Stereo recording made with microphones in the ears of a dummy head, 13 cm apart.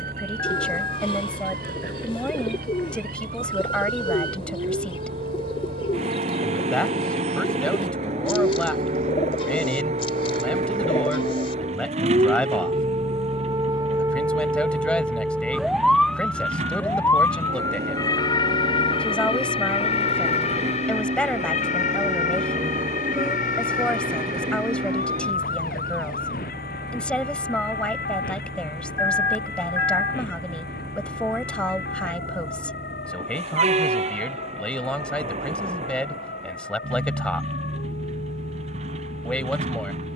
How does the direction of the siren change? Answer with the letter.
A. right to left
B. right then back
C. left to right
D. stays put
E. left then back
A.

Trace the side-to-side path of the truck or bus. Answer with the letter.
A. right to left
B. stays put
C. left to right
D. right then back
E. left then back
B.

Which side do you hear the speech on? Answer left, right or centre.
centre.